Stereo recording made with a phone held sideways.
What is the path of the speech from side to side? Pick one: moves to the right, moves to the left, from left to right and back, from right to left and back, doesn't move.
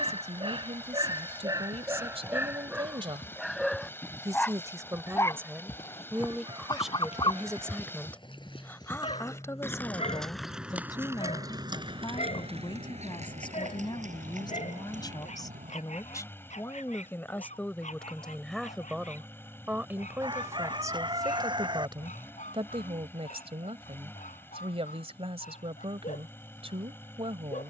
from right to left and back.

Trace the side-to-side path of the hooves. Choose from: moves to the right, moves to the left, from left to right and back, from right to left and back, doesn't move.
moves to the right.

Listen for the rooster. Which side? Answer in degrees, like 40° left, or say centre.
40° right.